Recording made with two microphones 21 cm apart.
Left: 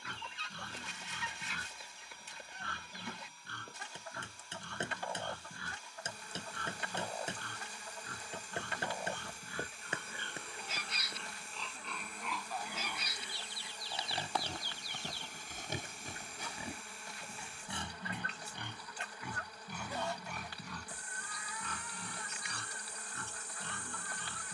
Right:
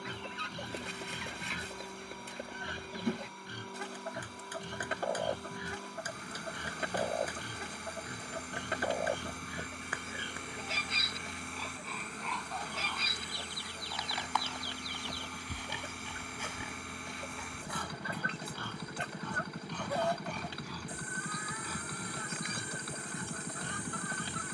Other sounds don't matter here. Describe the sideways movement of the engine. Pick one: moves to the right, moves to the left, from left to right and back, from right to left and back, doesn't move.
doesn't move.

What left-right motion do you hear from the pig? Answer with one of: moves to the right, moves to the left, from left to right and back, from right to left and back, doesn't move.
from right to left and back.